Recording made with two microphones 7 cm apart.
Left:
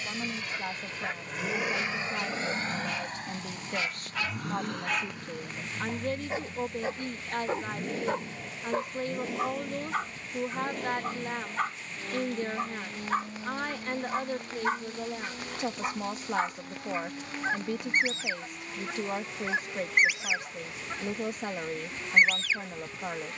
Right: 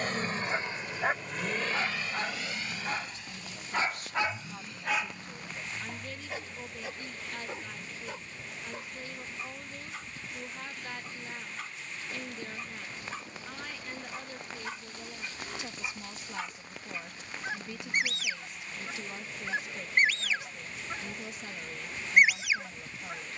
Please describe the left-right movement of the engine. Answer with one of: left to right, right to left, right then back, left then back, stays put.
right to left.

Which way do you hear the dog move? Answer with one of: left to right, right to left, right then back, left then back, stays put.
left then back.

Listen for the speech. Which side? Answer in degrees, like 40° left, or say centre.
60° left.